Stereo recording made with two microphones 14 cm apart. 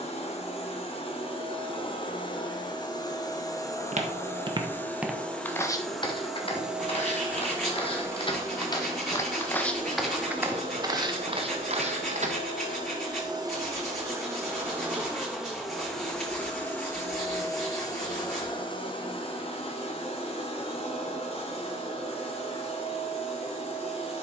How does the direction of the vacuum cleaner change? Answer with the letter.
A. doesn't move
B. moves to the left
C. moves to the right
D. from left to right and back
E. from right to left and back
D.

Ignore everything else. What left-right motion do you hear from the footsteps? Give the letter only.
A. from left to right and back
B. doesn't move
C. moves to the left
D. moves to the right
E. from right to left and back
E.